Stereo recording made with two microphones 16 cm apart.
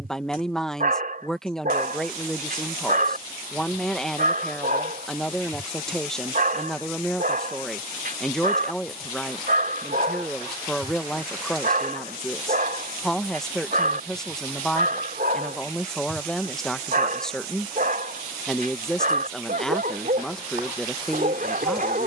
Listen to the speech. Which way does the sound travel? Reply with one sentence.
You can hear the speech stay in one place.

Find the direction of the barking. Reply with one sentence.
You can hear the barking on the right.